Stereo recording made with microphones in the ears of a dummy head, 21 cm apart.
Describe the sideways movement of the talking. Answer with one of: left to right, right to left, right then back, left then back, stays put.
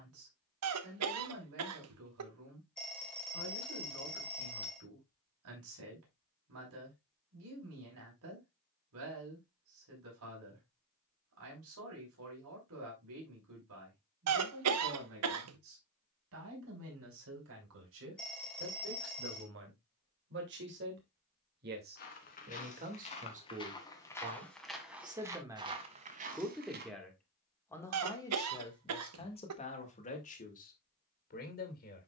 right to left.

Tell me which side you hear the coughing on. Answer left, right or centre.
right.